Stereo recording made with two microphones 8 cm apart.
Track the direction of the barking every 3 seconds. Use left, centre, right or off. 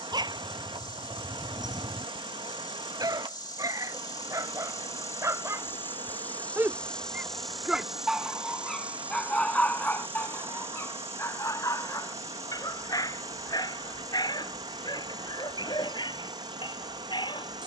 right, right, centre, left, left, left.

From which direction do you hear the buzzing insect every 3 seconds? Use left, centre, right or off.
left, left, centre, right, right, right.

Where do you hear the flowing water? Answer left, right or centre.
right.